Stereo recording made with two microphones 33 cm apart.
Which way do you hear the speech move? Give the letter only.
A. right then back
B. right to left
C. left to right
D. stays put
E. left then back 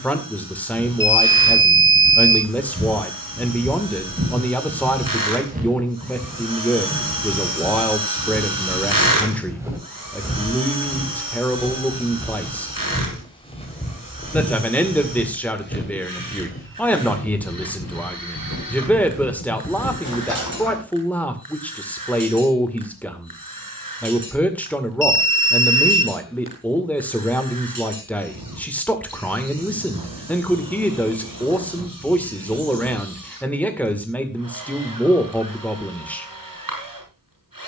D.